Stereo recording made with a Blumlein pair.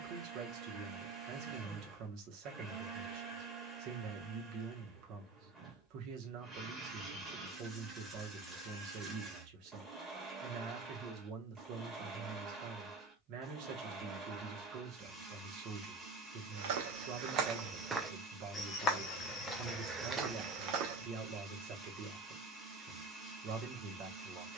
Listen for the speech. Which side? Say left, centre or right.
right.